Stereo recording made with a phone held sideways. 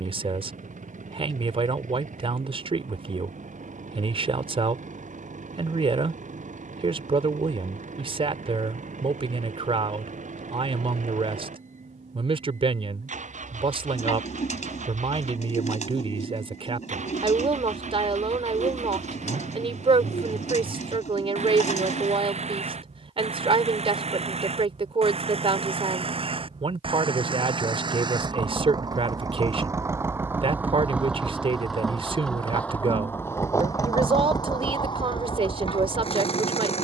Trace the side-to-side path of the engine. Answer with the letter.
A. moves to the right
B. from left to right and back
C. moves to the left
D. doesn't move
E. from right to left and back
C.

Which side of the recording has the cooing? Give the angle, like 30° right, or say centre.
60° left.